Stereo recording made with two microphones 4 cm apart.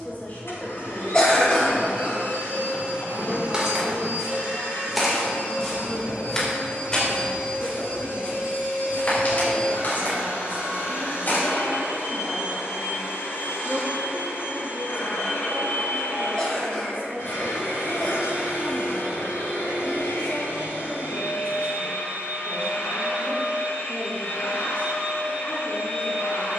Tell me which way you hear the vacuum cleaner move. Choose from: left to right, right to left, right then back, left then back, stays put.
stays put.